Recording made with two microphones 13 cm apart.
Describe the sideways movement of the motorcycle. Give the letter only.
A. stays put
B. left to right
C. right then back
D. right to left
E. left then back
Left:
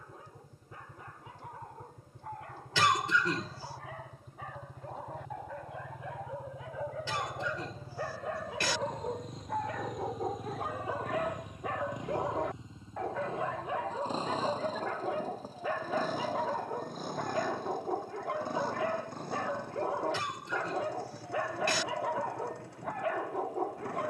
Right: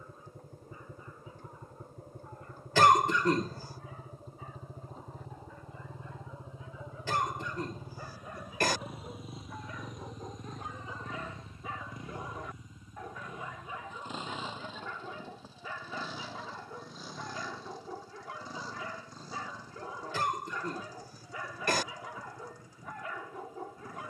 D.